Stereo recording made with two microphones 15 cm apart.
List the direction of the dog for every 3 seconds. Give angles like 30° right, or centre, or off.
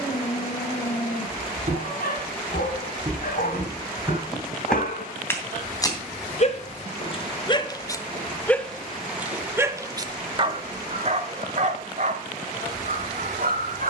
70° left, 60° left, 30° left, 40° right, 60° right.